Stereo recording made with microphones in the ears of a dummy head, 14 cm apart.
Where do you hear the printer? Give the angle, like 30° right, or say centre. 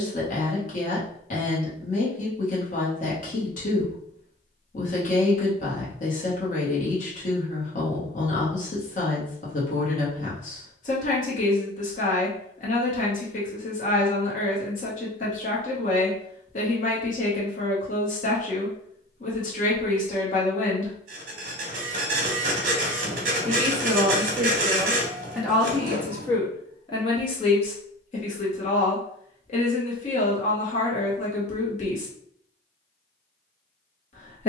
50° right.